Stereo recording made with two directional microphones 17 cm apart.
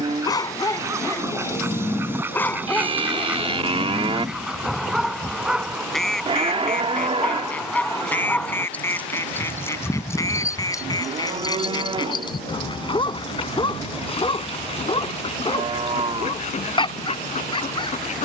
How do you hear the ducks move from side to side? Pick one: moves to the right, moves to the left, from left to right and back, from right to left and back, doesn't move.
moves to the left.